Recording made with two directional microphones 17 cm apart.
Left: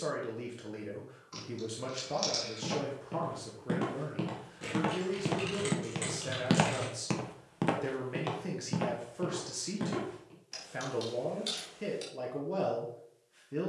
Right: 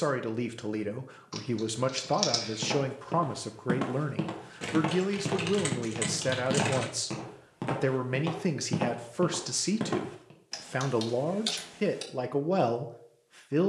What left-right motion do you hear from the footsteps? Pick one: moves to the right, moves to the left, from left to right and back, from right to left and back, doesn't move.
from right to left and back.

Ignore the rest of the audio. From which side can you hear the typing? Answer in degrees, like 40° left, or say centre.
40° right.